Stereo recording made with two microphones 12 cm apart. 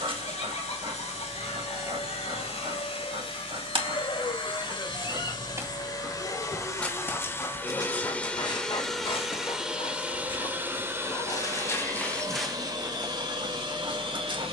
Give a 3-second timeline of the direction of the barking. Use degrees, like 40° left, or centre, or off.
40° right, 40° right, 20° left, 40° left, 20° right.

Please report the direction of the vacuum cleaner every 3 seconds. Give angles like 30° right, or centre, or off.
60° left, 40° left, 20° left, 10° right, 40° right.